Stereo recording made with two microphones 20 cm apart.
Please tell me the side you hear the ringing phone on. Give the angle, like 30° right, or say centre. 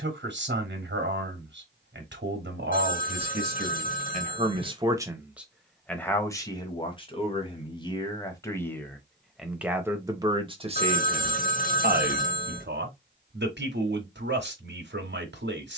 40° left.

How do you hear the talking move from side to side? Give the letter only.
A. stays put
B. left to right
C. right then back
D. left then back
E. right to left
D.